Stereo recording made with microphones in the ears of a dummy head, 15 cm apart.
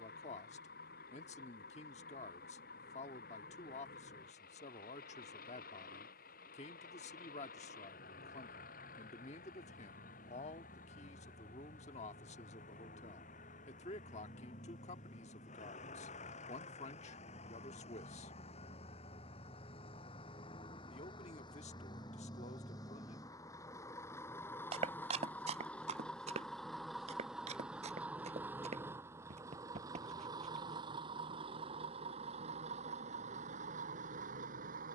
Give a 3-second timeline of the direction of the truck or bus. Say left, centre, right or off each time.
left, left, left, left, left, left, left, left, centre, centre, right, right.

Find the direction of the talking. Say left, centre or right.
left.